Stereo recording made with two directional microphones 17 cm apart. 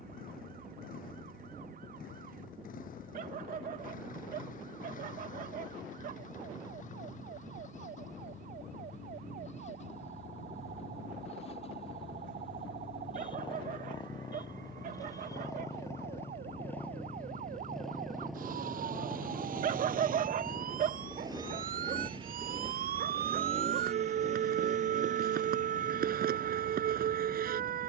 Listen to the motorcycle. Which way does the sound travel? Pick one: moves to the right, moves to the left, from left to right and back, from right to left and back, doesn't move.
moves to the right.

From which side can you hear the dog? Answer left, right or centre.
right.